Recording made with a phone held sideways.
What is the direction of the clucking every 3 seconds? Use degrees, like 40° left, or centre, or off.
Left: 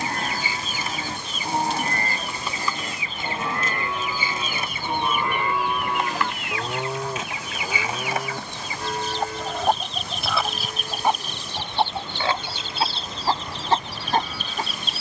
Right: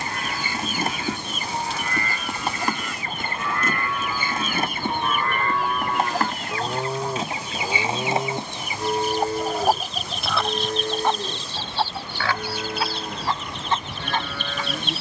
60° right, 50° right, 30° right, centre, 30° left.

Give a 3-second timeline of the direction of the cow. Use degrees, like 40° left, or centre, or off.
40° left, 20° left, 10° right, 40° right, 60° right.